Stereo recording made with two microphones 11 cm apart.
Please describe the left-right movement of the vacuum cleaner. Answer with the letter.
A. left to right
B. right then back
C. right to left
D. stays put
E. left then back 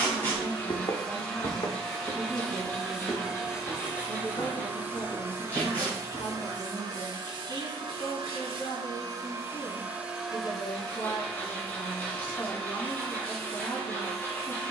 B.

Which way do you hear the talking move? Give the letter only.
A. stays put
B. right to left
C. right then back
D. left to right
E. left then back
A.